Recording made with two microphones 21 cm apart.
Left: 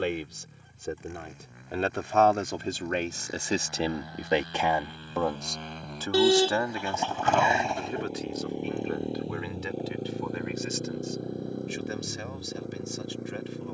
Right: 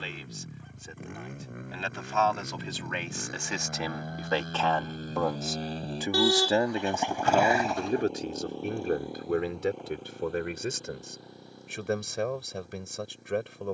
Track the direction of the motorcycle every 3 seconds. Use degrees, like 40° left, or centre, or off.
60° right, 50° right, centre, 40° left, 60° left.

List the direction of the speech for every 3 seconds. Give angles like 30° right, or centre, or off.
60° left, 20° left, 30° right, 60° right, 60° right.